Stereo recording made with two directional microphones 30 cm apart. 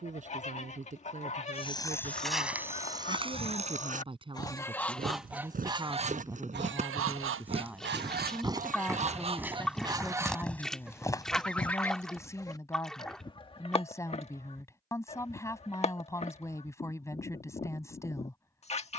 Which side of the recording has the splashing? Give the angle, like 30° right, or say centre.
centre.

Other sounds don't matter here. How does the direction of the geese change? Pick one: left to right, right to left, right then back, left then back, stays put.
right then back.